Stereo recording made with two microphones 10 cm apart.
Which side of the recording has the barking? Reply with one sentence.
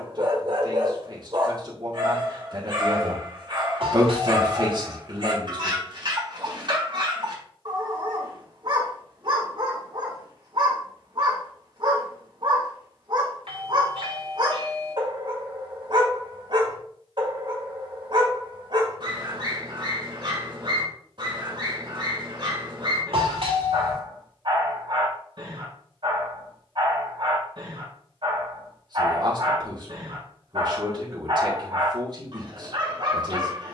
You can hear the barking on the right.